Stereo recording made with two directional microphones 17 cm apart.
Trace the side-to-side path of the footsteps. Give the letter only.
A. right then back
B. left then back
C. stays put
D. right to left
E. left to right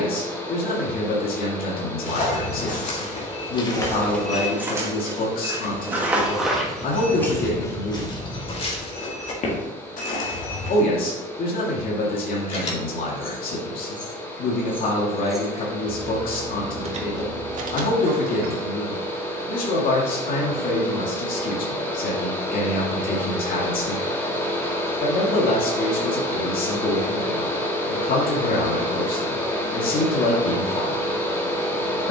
A.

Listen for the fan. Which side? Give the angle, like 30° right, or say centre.
10° left.